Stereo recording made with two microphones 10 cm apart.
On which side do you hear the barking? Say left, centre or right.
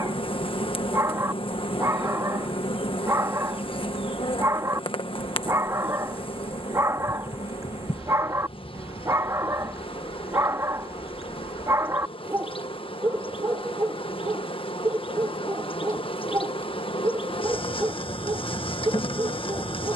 right.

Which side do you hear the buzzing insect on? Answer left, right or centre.
left.